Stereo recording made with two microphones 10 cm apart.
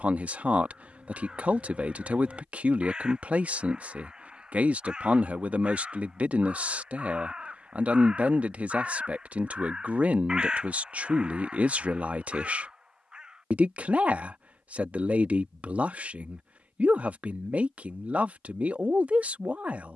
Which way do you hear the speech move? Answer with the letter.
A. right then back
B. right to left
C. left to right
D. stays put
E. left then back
D.